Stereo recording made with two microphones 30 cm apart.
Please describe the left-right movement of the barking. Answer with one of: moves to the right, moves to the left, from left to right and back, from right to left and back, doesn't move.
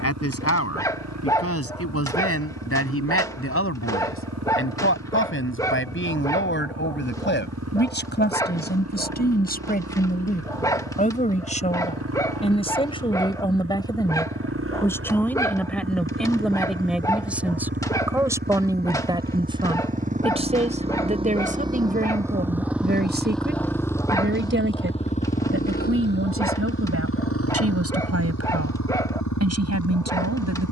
doesn't move.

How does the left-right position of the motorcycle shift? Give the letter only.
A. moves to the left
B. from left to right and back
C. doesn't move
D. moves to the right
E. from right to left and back
A.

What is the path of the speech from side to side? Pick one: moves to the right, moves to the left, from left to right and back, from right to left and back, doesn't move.
moves to the right.